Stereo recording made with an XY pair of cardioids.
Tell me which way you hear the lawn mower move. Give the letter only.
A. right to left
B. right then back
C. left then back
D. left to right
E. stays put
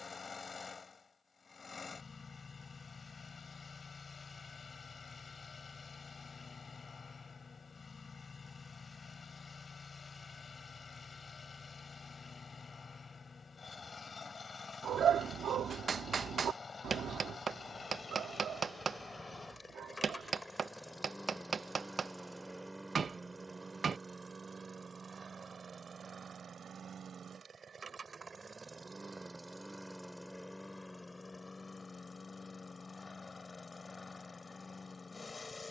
B.